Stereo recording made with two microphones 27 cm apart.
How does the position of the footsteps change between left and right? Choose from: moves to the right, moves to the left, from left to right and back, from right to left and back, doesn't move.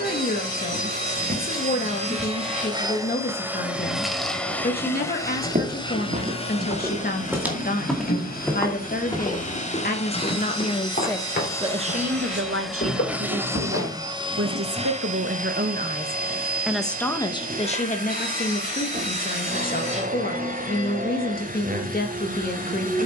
moves to the left.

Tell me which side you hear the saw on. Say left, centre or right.
right.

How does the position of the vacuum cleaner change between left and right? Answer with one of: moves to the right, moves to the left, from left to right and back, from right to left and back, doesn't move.
from right to left and back.